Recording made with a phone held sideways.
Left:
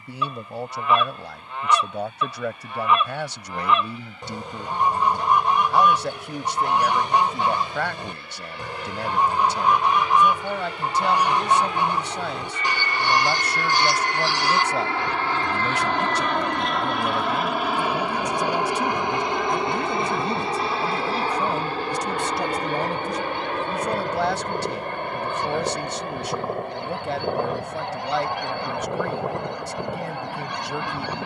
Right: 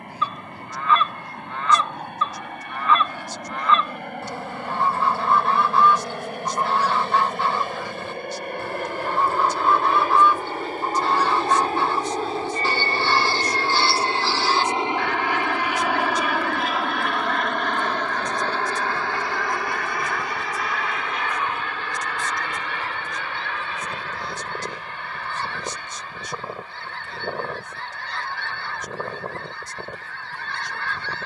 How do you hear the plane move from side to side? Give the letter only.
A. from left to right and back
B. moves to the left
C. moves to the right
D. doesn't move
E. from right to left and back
B.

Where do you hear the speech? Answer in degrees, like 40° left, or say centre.
80° left.